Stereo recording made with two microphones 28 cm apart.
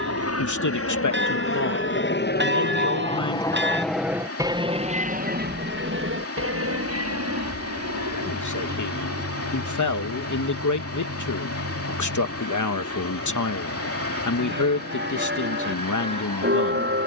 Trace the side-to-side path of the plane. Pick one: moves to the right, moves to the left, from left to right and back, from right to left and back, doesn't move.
moves to the right.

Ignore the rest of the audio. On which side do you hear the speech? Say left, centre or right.
left.